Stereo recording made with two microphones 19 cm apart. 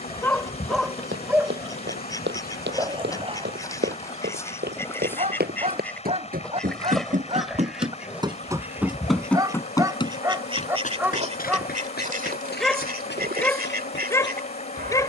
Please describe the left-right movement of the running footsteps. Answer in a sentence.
You can hear the running footsteps move to the left.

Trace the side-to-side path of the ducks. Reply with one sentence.
You can hear the ducks move to the right.